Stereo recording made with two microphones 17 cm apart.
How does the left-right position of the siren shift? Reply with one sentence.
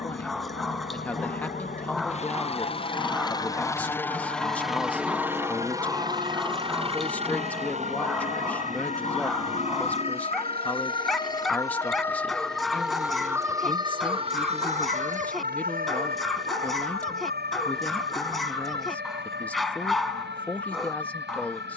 You can hear the siren travel towards the right.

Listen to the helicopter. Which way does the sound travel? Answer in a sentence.
In this clip you hear the helicopter move to the right.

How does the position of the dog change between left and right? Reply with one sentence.
In this clip you hear the dog stay put.